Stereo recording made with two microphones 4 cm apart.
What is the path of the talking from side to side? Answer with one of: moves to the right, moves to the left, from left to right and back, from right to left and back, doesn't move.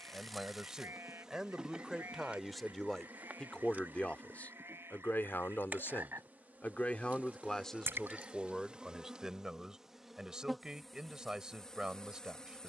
from right to left and back.